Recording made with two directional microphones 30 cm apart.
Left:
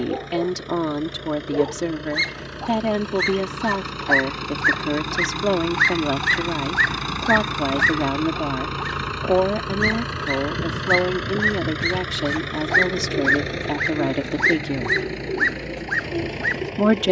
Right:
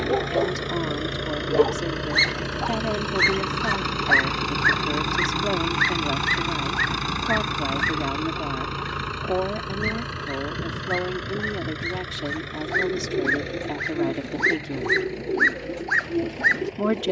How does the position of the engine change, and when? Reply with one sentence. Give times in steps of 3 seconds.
In this clip you hear the engine on the right from 0 s, in the centre from 6 s and on the left from 9 s.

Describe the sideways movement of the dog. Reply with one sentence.
You can hear the dog move from right to left and back again.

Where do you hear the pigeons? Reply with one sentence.
In this clip you hear the pigeons in the centre.